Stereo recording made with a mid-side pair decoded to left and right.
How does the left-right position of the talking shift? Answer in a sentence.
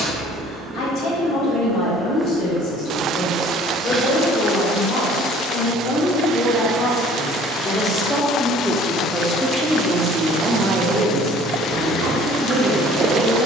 You can hear the talking travel towards the right.